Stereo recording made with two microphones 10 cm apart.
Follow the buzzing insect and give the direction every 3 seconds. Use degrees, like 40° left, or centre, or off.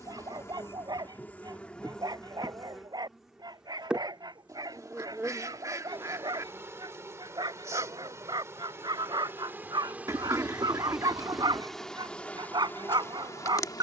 10° left, 10° right, 30° right, 10° right, 20° left.